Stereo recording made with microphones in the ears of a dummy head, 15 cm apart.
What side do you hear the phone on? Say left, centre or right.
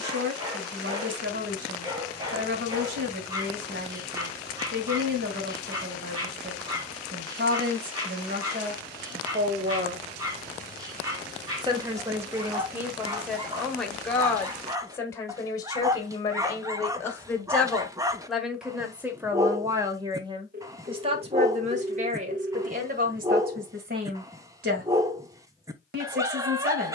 right.